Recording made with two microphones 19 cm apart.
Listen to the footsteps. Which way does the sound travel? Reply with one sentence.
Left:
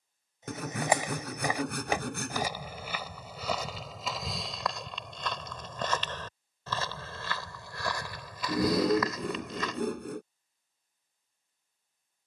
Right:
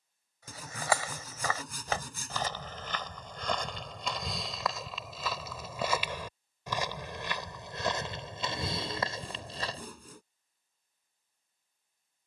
You can hear the footsteps go from the left side to the right.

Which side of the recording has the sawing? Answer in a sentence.
In this clip you hear the sawing on the left.